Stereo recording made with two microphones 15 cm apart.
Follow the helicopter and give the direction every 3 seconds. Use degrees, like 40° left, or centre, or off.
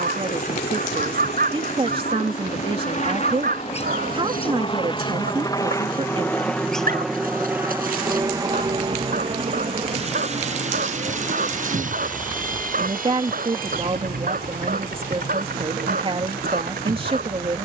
60° left, 40° left, 10° right, 50° right, 60° right, 70° right.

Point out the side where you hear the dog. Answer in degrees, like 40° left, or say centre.
70° right.